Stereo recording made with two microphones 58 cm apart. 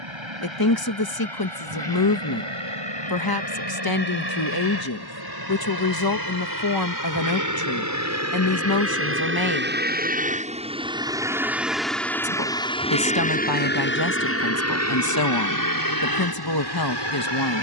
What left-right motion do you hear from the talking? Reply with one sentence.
In this clip you hear the talking stay put.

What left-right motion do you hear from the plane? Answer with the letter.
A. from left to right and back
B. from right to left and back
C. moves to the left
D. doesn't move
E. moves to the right
C.